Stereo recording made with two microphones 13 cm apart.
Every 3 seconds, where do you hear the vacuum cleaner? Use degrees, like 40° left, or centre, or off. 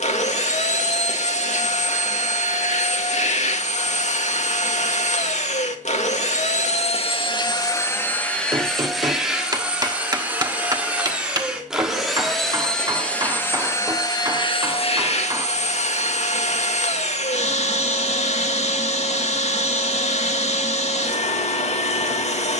60° left, 60° left, 30° left, 10° right, 20° left, 60° left, 60° left, 60° left.